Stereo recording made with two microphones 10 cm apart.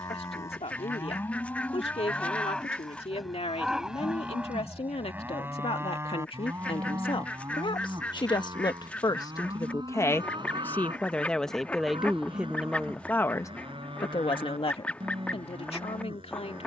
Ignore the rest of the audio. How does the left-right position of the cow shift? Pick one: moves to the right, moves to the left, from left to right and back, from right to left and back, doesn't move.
moves to the right.